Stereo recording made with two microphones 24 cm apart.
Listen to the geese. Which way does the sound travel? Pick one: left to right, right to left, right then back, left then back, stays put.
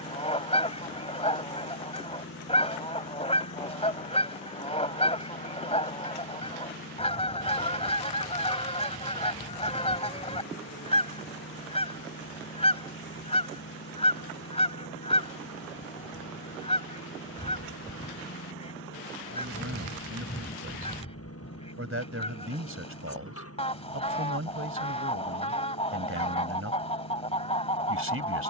stays put.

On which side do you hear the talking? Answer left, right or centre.
right.